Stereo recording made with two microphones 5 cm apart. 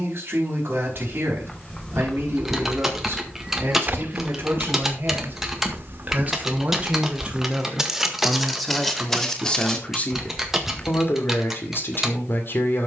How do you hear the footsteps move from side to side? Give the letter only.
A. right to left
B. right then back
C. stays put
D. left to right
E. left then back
B.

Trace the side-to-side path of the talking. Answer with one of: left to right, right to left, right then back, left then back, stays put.
right to left.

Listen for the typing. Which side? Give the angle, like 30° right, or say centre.
10° right.